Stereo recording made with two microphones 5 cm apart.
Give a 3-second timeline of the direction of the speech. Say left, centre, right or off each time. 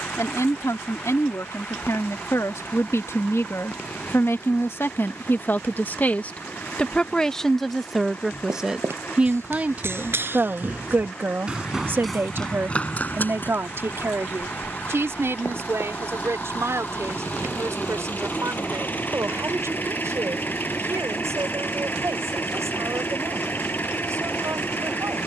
left, left, centre, right, right, right, right, right, right.